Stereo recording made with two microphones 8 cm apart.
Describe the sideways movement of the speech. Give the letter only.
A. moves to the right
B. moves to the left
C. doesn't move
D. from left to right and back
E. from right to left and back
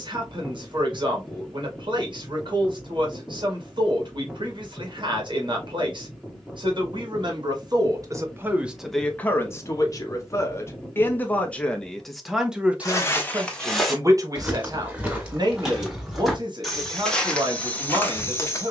E.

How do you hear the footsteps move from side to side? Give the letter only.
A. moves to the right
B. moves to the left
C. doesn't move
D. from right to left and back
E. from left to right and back
E.